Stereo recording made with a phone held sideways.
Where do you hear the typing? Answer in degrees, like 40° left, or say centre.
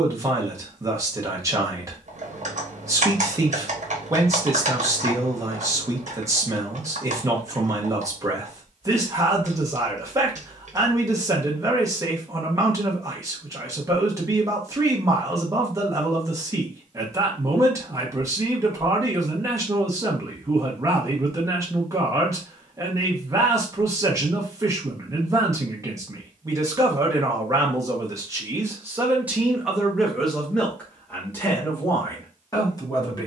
60° right.